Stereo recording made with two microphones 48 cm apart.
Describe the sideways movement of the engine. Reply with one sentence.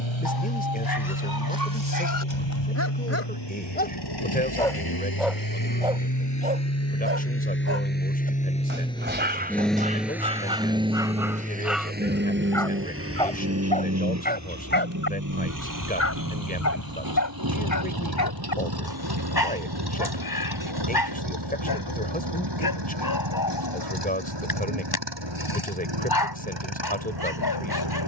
In this clip you hear the engine travel towards the right.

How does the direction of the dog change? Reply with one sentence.
You can hear the dog go right and come back.